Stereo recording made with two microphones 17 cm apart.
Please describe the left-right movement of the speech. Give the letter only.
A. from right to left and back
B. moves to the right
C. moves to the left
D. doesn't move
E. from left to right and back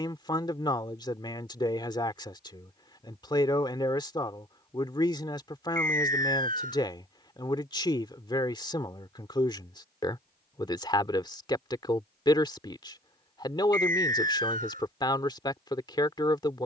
D.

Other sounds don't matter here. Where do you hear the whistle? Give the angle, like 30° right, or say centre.
50° right.